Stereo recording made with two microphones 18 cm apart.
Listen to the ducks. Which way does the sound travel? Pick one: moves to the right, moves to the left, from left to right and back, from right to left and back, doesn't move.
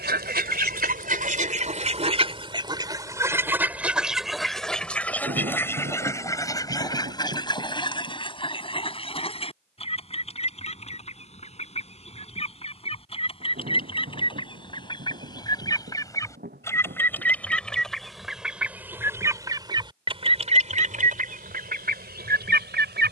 from right to left and back.